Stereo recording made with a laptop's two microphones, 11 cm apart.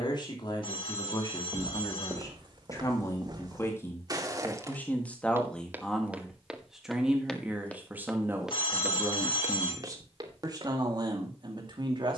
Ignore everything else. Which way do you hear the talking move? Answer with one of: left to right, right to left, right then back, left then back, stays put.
left to right.